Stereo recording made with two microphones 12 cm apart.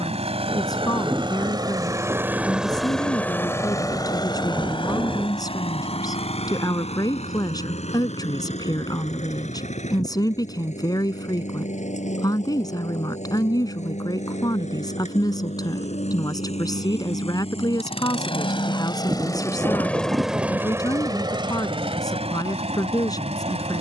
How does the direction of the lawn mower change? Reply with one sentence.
You can hear the lawn mower go left and come back.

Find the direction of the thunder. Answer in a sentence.
In this clip you hear the thunder on the right.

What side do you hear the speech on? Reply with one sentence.
You can hear the speech on the left.